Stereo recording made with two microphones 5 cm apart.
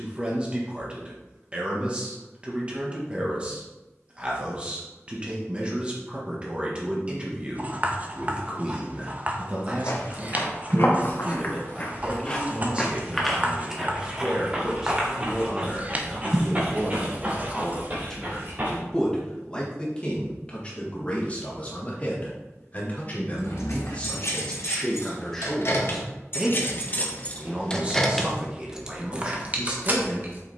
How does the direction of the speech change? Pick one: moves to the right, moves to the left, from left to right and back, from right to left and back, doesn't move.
from right to left and back.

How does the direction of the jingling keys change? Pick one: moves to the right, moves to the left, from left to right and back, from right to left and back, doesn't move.
moves to the right.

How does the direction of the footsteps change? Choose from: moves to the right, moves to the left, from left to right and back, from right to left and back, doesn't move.
moves to the right.